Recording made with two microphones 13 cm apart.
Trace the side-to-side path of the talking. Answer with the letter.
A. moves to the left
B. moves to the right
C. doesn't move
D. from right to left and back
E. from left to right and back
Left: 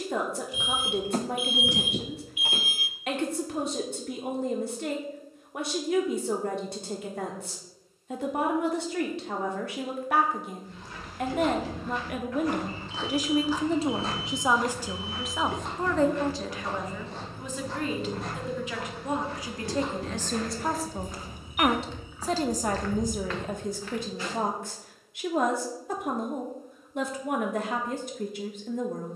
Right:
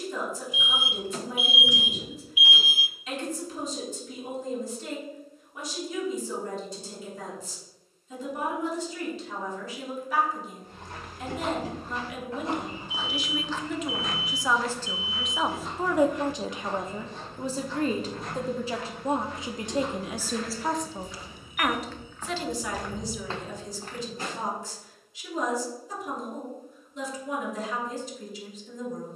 E.